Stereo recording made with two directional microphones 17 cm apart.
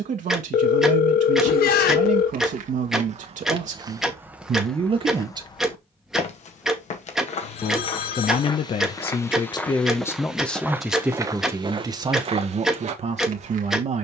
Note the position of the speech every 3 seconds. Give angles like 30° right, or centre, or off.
50° right, 40° right, 40° left, 10° left, 40° right.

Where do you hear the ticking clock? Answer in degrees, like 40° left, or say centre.
centre.